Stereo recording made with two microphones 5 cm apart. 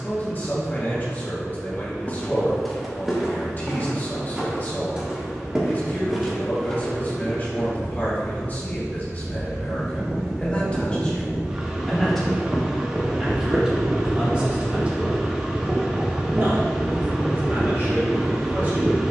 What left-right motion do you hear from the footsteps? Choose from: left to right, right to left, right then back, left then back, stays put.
right then back.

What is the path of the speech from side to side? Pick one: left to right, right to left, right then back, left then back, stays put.
left to right.